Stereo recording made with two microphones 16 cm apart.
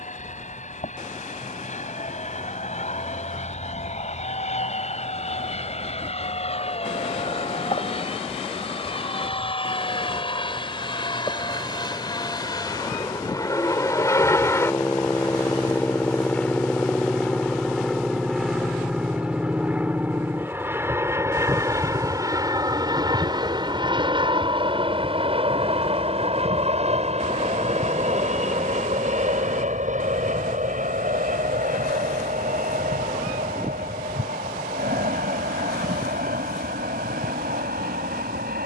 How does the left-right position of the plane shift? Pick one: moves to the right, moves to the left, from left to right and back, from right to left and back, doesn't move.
moves to the right.